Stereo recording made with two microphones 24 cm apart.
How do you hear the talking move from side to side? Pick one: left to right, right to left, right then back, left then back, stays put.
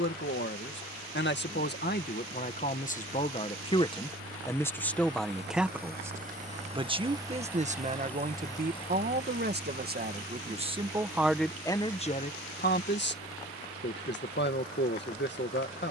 right then back.